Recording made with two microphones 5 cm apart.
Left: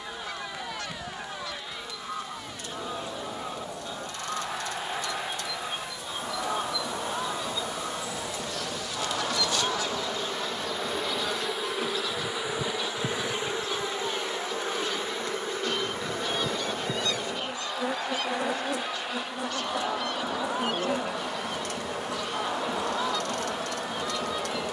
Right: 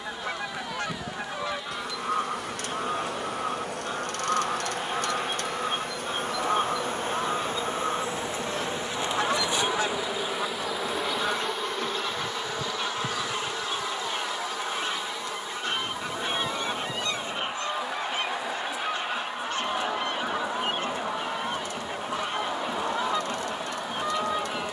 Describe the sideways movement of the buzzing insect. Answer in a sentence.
You can hear the buzzing insect go from the right side to the left.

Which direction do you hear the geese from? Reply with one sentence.
You can hear the geese on the right.